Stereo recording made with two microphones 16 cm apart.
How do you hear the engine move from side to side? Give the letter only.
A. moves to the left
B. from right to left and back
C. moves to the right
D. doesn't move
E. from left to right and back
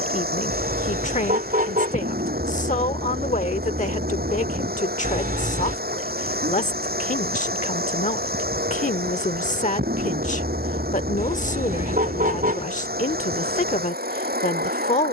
D.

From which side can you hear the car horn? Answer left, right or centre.
right.